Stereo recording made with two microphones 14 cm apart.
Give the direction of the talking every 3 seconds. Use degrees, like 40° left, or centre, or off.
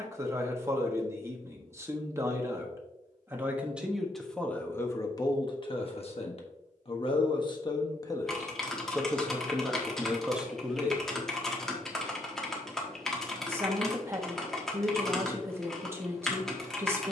20° right, 10° left, 30° left, centre, 20° right, 20° right.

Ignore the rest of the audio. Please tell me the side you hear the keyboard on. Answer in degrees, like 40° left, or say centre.
centre.